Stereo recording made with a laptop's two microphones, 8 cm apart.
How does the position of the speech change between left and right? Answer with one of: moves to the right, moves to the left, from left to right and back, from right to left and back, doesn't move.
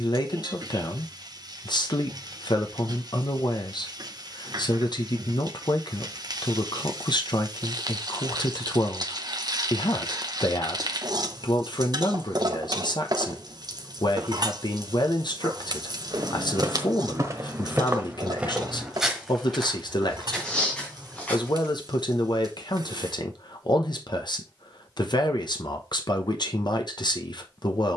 doesn't move.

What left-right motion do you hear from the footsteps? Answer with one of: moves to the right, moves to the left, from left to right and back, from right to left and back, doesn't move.
moves to the left.